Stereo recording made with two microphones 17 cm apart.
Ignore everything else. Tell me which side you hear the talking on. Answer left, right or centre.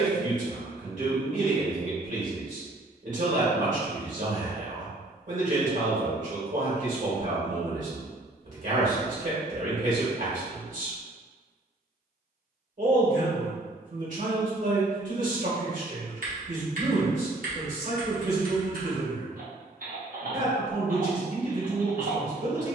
right.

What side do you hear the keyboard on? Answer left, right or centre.
right.